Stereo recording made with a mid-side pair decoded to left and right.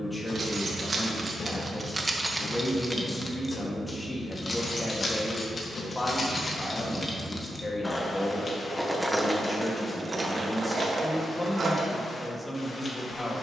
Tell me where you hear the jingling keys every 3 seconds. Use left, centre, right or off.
right, left, left, right, off.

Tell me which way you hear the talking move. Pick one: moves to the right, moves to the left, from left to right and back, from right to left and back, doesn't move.
doesn't move.